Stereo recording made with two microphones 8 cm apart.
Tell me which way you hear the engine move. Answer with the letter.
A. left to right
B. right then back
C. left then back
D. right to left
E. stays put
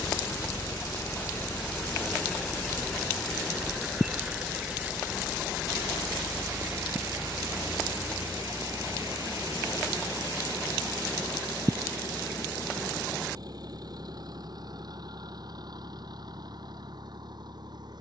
A.